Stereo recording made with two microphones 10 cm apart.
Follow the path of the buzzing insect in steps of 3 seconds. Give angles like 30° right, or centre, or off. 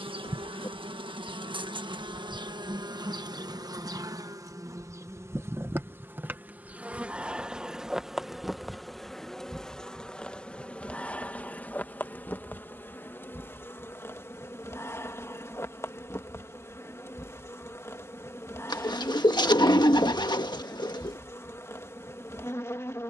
60° right, 40° right, 10° right, 10° left, 20° left, 30° left, 30° left, 30° left.